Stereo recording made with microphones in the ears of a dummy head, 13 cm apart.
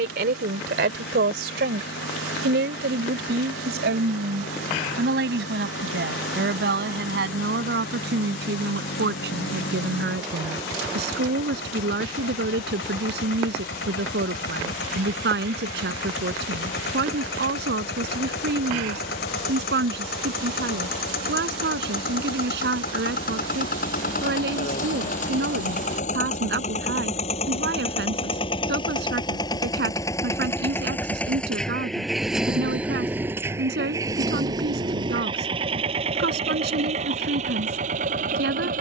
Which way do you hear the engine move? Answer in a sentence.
You can hear the engine go from the left side to the right.